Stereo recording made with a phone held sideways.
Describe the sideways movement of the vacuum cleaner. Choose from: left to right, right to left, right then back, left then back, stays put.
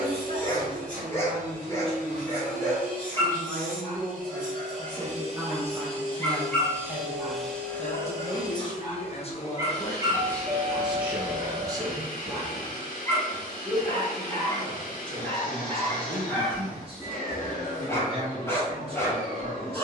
right to left.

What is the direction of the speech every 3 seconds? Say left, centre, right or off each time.
right, right, left, centre, right, right, right.